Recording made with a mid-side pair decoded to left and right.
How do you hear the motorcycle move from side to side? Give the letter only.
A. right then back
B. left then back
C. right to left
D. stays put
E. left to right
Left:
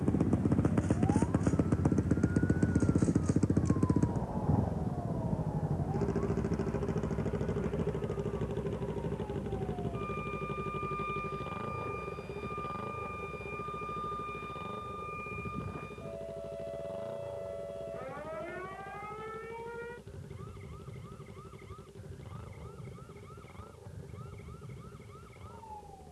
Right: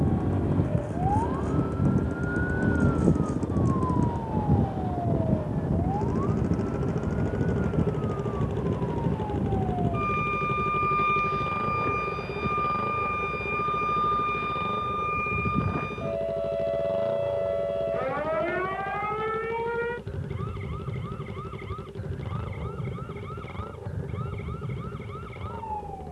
E.